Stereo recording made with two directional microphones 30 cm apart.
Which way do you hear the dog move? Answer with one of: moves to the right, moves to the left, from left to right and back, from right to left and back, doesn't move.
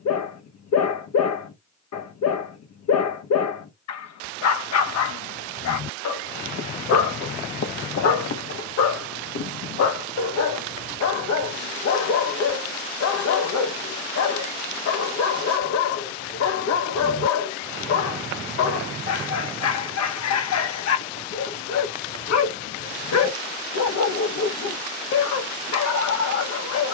doesn't move.